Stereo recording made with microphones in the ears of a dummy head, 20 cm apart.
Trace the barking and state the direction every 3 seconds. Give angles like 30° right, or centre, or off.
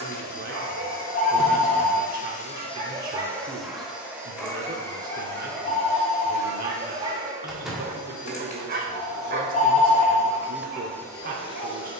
40° right, centre, 20° right, 50° right.